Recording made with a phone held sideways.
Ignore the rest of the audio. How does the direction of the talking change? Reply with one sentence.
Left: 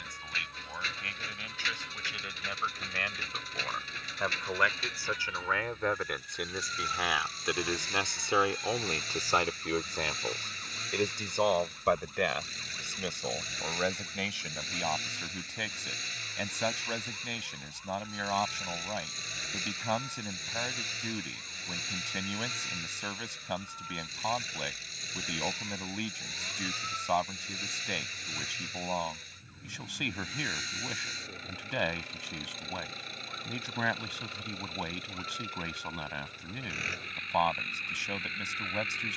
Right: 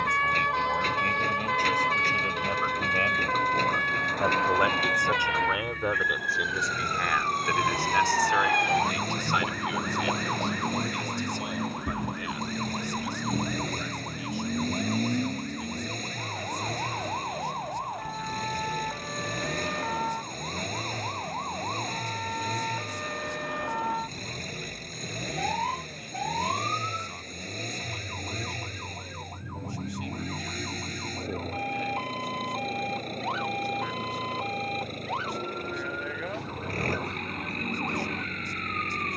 In this clip you hear the talking go from the right side to the left.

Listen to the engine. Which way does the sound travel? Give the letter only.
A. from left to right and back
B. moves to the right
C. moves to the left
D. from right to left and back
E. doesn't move
E.